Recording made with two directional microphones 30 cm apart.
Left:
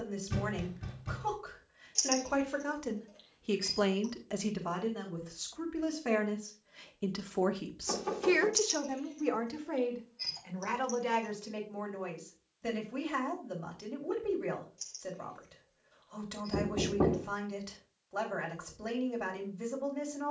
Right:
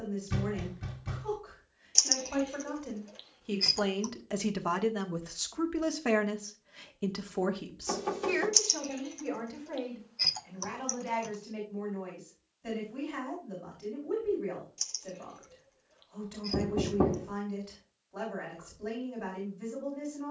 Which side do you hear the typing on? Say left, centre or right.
right.